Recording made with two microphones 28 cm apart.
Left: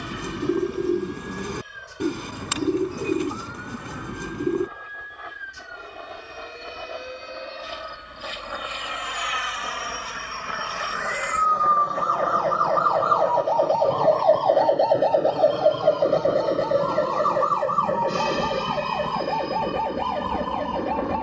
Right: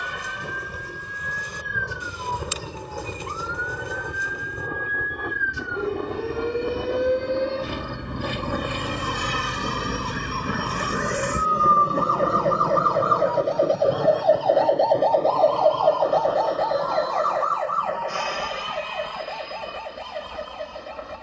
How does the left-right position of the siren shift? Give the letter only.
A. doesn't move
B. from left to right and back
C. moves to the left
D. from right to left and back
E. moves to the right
C.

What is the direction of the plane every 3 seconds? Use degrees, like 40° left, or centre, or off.
70° right, 70° right, 60° right, 50° right, 20° right, 20° left, 50° left.